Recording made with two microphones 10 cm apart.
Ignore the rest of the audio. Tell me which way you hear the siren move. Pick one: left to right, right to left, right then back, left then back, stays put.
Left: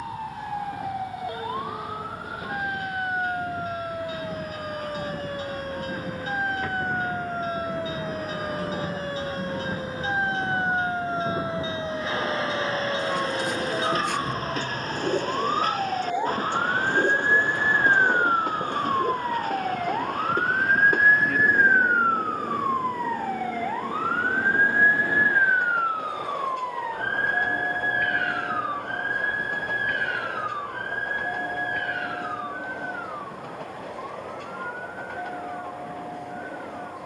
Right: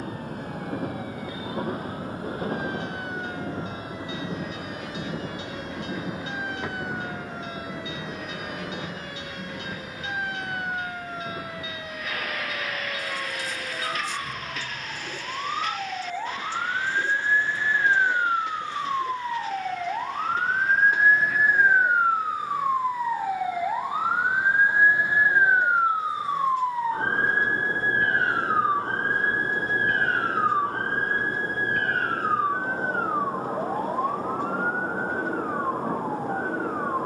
left to right.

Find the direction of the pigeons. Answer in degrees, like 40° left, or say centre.
60° left.